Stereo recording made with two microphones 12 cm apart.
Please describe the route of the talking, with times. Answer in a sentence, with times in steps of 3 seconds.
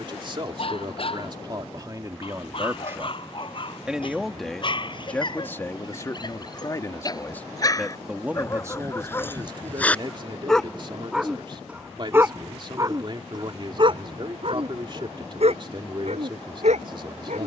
You can hear the talking on the right from 0 s, in the centre from 3 s and on the right from 9 s.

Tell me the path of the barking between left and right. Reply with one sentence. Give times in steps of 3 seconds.
You can hear the barking on the left from 0 s, in the centre from 9 s and on the right from 12 s.